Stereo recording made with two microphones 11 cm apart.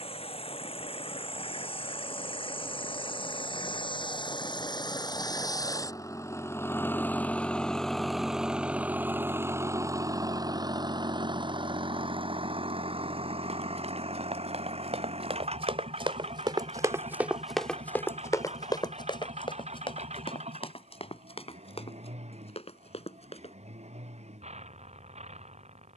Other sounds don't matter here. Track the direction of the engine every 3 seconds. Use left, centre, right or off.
left, left, centre, right, right, right, right, right, right.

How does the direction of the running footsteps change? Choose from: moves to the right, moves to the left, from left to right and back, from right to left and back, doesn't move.
moves to the left.